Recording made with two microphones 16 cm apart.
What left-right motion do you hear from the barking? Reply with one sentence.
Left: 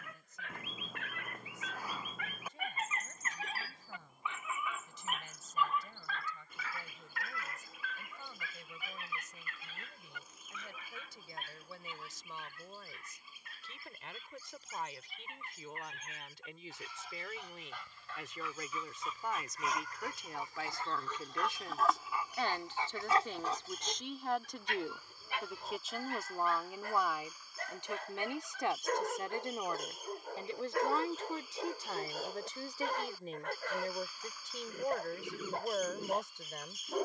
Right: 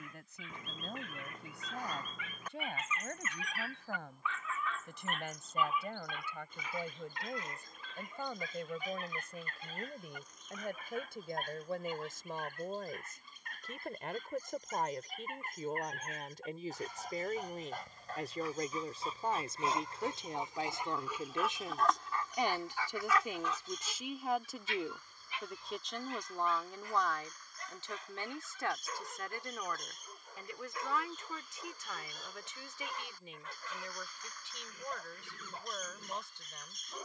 You can hear the barking go right and come back.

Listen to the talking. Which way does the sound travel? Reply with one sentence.
In this clip you hear the talking go from the right side to the left.